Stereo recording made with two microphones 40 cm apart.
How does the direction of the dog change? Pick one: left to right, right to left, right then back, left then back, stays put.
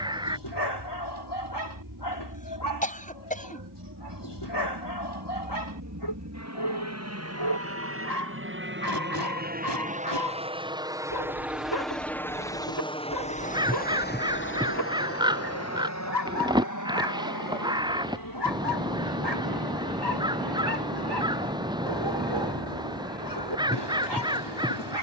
stays put.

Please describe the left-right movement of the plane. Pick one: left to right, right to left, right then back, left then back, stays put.
right to left.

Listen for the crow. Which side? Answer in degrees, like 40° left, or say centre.
10° right.